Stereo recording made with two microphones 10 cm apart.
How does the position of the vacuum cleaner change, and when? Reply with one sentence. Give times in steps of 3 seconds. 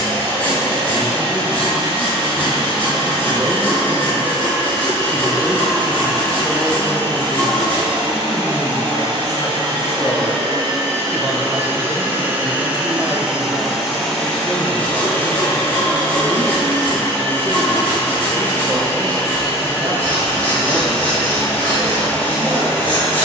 In this clip you hear the vacuum cleaner on the right from 0 s, in the centre from 12 s and on the left from 15 s.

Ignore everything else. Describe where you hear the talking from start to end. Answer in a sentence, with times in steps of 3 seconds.
You can hear the talking on the right from 0 s, on the left from 6 s, in the centre from 9 s and on the right from 12 s.